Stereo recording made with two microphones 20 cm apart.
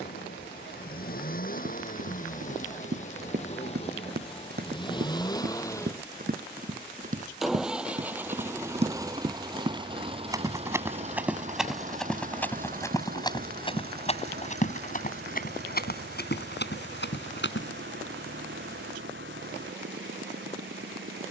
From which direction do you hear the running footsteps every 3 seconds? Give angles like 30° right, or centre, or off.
60° right, 50° right, 40° right, 10° right, 20° left, 50° left, off.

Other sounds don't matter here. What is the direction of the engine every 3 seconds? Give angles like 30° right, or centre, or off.
40° left, 30° left, 10° right, 30° right, 50° right, 60° right, 70° right.